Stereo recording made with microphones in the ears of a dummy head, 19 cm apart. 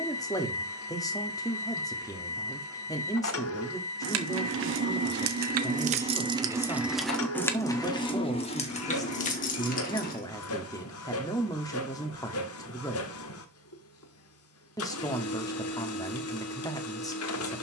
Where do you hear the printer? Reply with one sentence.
In this clip you hear the printer on the left.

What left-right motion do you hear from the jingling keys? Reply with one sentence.
You can hear the jingling keys travel towards the left.